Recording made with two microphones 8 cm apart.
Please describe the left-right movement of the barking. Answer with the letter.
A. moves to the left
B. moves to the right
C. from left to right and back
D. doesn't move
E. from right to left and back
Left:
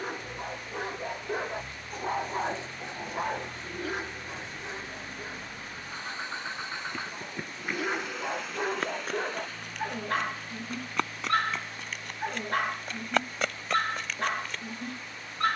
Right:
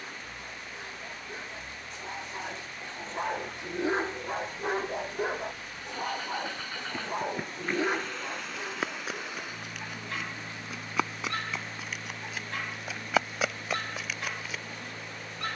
C.